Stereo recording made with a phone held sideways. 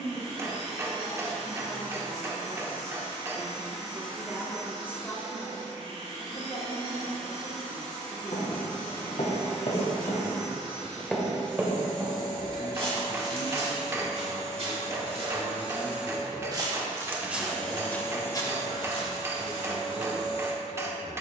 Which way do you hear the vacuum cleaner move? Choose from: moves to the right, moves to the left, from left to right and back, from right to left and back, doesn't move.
moves to the left.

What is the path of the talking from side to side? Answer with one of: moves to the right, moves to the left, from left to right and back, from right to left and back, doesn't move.
from right to left and back.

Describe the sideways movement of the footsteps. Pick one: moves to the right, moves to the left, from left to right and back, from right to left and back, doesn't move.
from left to right and back.